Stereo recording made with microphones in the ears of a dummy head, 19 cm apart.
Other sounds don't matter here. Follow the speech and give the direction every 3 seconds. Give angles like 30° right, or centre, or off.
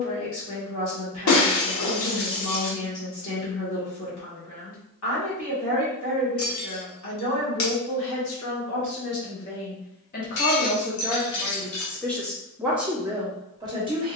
70° left, 70° left, 70° left, 40° left, 10° right.